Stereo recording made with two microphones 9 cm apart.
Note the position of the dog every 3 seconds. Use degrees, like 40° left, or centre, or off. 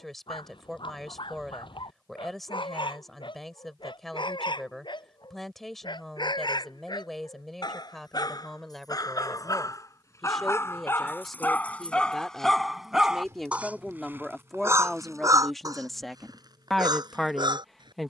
70° left, 60° left, 50° left, 30° left, 10° right, 50° right.